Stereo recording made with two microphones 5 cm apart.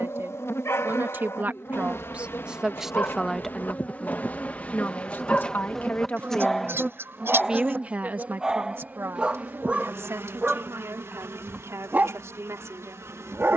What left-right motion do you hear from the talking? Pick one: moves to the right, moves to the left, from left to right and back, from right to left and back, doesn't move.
from right to left and back.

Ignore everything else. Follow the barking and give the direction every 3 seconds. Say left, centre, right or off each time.
left, left, centre, right, right.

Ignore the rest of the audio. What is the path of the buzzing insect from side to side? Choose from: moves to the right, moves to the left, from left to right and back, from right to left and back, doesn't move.
moves to the right.